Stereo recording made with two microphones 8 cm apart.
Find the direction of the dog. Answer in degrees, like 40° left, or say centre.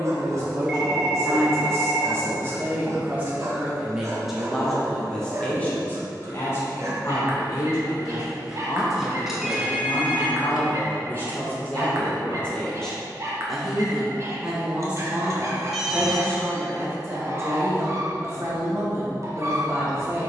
40° right.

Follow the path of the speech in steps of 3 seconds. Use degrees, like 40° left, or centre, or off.
40° right, centre, 40° left, 30° left, centre, 30° right, 40° right.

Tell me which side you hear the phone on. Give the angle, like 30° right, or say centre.
10° right.